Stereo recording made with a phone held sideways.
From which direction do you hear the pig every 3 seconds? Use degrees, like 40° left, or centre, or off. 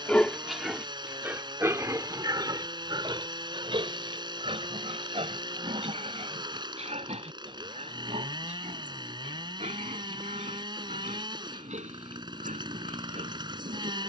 20° right, 40° right, 50° right, 60° right, 60° right.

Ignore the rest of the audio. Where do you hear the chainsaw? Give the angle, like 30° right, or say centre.
30° right.